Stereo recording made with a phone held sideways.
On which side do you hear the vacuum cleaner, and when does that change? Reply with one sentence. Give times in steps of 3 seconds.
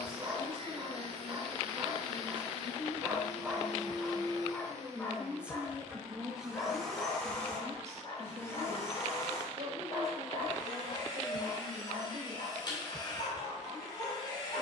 You can hear the vacuum cleaner on the right from 0 s, in the centre from 6 s and on the left from 9 s.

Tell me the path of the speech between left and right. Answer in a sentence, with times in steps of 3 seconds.
In this clip you hear the speech on the left from 0 s, in the centre from 3 s and on the right from 6 s.